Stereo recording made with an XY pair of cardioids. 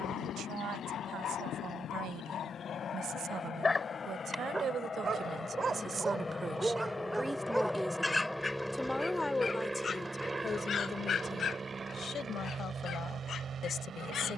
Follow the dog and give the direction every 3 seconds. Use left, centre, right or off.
left, centre, centre, left, left.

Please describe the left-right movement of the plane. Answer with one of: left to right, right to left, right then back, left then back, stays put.
left to right.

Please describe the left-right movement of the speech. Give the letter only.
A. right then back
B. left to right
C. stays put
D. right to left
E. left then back
D.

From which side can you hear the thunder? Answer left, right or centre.
left.